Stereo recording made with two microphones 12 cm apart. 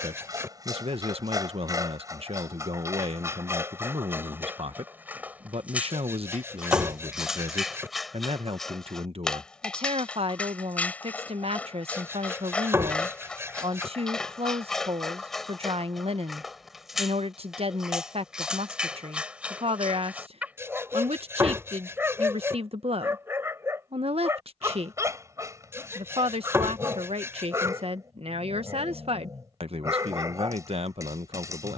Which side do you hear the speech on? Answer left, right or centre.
right.